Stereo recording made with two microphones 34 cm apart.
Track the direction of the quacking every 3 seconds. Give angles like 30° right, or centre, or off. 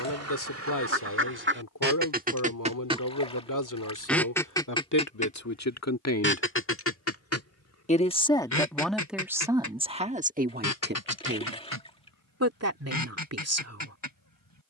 30° right, 10° left, 40° left, 60° left, 70° left.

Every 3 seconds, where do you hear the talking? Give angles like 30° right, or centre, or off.
60° left, 60° left, 20° left, 20° right, 50° right.